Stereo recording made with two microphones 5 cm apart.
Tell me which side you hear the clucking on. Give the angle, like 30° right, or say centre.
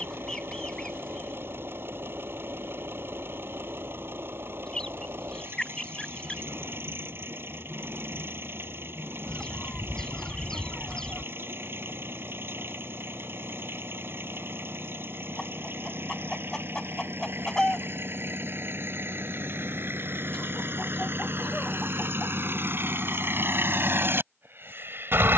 10° left.